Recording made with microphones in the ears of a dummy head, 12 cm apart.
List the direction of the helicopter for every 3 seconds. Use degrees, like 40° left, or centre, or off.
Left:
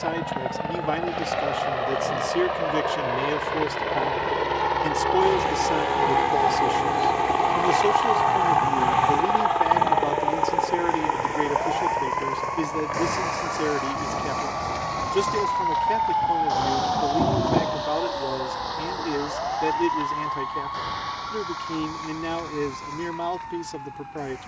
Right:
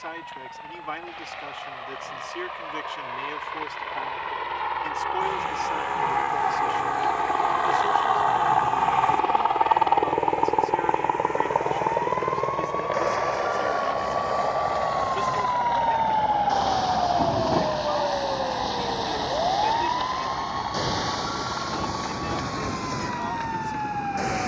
60° left, 50° left, 20° left, 10° right, 40° right, 50° right, 50° right, 60° right.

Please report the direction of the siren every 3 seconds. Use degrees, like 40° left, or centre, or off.
50° left, 50° left, 50° left, 40° left, 20° left, centre, 30° right, 60° right.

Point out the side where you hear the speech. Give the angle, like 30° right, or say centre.
50° left.